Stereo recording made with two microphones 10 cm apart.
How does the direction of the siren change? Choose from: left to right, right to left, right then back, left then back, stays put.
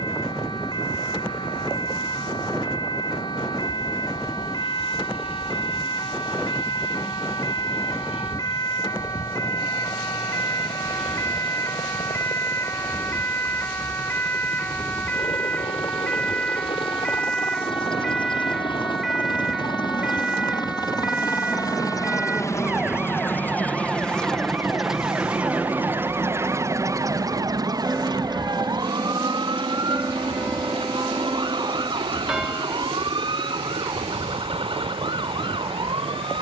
left to right.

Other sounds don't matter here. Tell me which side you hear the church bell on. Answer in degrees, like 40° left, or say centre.
10° right.